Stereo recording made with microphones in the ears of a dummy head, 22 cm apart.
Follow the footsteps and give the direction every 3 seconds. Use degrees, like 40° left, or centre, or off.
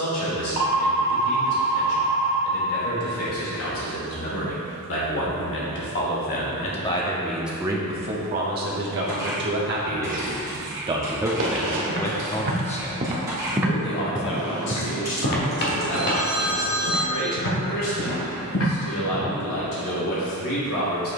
off, off, off, 60° right, 10° right, 50° left, 60° left.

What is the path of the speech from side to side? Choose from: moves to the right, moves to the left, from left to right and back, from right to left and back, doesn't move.
from left to right and back.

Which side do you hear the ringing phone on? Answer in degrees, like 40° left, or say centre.
50° right.